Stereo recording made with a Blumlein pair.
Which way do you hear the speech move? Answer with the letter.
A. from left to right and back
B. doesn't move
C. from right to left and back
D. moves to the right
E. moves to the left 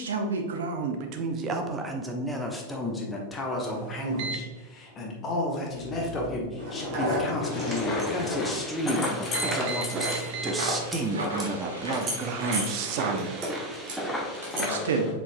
C.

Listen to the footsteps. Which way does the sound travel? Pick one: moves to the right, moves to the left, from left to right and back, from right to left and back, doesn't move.
from left to right and back.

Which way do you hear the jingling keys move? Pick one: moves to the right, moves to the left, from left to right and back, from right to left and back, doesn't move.
from right to left and back.